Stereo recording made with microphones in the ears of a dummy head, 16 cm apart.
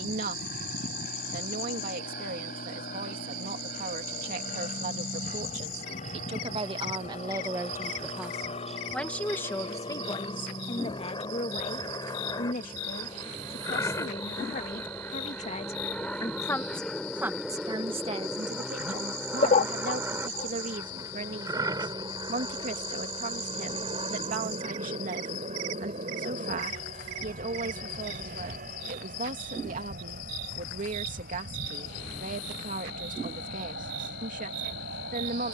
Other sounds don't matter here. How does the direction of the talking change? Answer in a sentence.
In this clip you hear the talking go left and come back.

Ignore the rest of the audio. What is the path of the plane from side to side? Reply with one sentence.
You can hear the plane move from left to right.